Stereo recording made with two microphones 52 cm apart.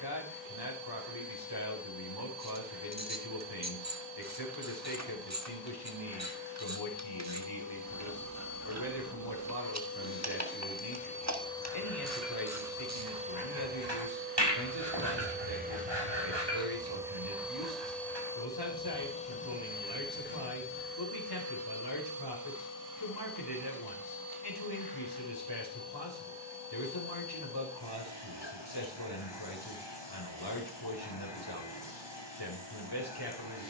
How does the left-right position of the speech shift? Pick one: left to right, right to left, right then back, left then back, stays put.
stays put.